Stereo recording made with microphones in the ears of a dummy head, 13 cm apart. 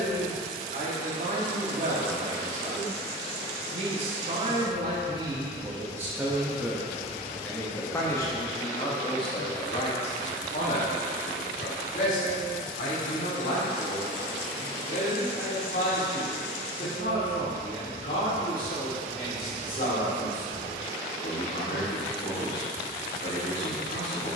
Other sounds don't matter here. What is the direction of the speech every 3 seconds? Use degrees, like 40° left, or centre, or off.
60° right, 30° right, 10° left, 40° left, 60° left, 60° left, 60° left, 60° left.